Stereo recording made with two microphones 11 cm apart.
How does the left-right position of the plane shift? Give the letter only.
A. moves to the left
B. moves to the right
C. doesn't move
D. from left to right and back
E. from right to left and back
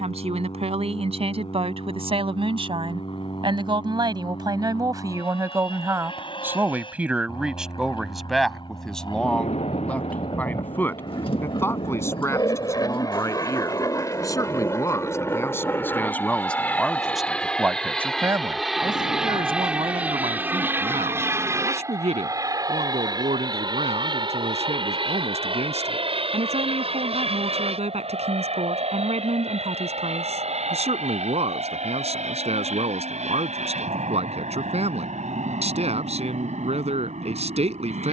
B.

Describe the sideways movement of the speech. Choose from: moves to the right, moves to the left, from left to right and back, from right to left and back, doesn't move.
from right to left and back.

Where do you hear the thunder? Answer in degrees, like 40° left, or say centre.
70° left.